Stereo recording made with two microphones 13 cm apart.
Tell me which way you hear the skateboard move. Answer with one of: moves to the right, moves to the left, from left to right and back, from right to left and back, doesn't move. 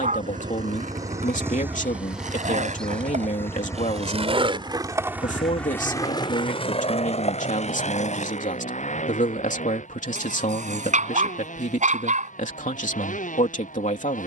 moves to the left.